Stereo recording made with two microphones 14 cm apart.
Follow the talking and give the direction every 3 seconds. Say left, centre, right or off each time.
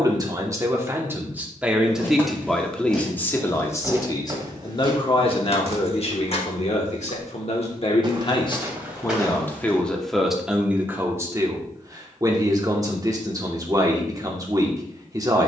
centre, left, left, centre, right.